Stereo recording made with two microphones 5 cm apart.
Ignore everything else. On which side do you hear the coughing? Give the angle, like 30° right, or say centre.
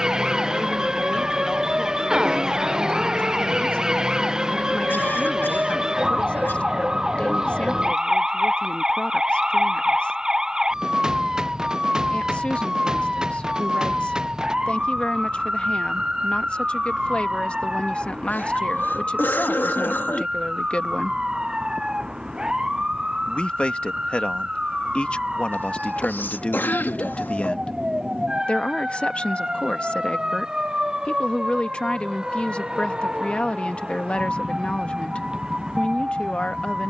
50° left.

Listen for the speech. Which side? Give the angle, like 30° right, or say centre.
20° left.